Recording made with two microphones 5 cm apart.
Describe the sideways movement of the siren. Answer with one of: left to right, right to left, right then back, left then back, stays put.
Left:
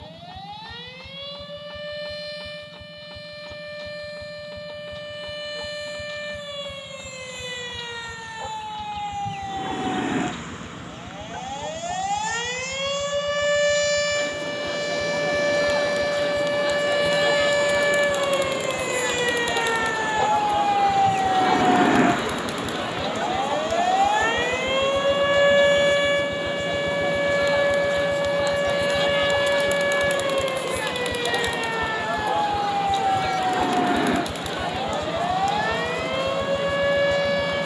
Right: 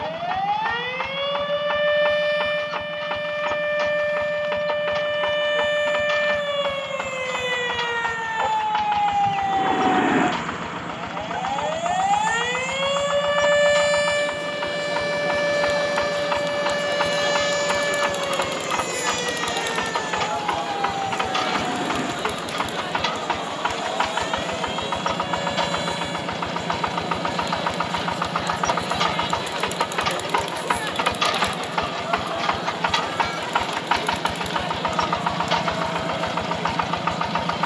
right to left.